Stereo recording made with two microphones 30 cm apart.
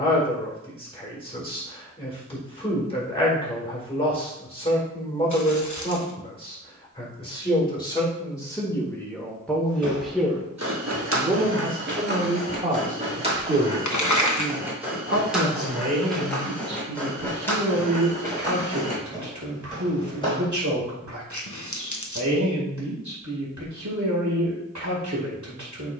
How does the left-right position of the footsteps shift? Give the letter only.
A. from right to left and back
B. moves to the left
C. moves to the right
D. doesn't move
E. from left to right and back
B.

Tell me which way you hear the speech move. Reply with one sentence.
In this clip you hear the speech travel towards the right.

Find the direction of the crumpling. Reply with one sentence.
In this clip you hear the crumpling on the left.